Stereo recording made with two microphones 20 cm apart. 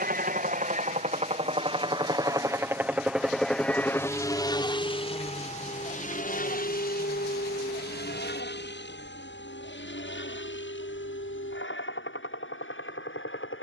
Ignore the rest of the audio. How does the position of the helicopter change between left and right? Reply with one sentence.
In this clip you hear the helicopter go from the right side to the left.